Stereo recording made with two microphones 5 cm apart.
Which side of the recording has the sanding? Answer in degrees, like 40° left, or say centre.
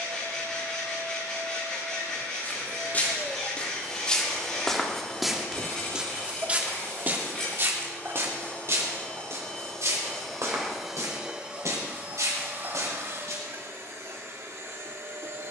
20° left.